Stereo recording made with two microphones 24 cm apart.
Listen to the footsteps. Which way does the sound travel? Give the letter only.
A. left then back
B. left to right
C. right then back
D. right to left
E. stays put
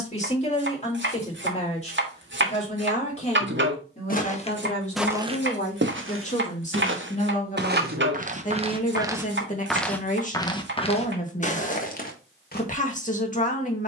C.